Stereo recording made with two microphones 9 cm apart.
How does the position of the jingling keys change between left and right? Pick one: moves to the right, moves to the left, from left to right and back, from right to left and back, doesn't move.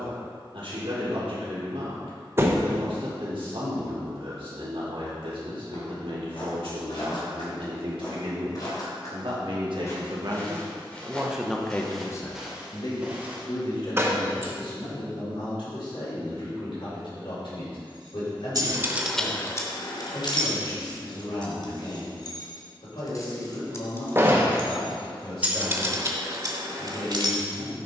from right to left and back.